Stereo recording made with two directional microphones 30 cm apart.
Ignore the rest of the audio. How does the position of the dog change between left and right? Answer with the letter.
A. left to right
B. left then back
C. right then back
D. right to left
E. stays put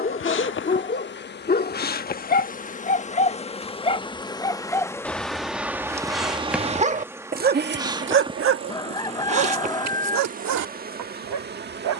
A.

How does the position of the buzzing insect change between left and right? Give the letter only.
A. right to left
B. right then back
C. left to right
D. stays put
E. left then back
C.